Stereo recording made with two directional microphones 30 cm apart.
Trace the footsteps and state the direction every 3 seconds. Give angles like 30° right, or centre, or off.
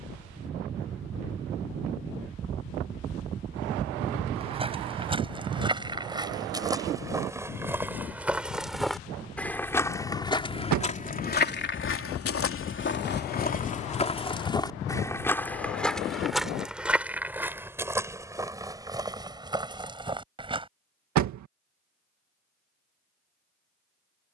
off, 20° right, 10° right, 20° left, 30° left, centre, 10° right, off.